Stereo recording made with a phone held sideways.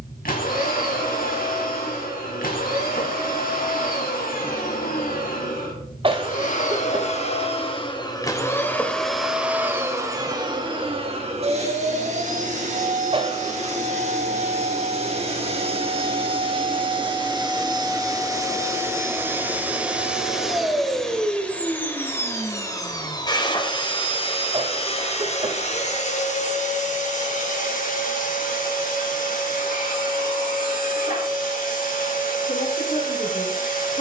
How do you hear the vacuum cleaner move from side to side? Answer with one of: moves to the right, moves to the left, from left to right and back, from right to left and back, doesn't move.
from left to right and back.